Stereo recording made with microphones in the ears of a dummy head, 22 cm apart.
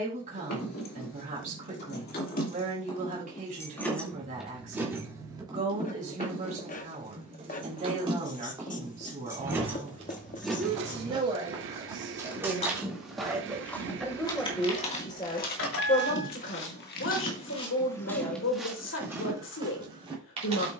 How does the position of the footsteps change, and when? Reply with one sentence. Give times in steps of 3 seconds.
In this clip you hear the footsteps not at all from 0 s, on the right from 9 s, in the centre from 12 s, on the left from 15 s and in the centre from 18 s.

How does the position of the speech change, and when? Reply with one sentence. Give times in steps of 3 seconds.
In this clip you hear the speech on the right from 0 s, in the centre from 12 s and on the left from 15 s.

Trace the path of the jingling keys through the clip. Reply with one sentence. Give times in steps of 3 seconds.
You can hear the jingling keys on the left from 0 s, in the centre from 3 s, on the right from 6 s, in the centre from 9 s, on the left from 12 s and not at all from 18 s.